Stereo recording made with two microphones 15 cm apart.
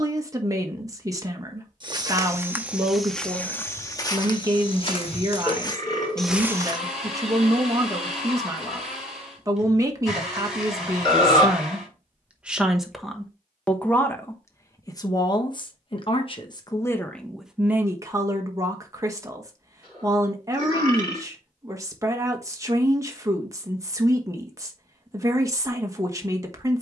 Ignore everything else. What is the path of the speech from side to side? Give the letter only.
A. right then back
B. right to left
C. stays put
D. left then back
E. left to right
D.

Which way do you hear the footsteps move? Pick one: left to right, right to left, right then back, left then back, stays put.
left then back.